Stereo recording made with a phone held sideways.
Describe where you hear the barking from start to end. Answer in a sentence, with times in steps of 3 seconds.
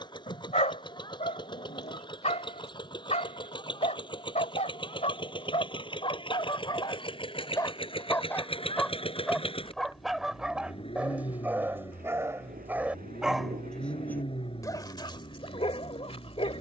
You can hear the barking on the left from 0 s, in the centre from 9 s and on the left from 15 s.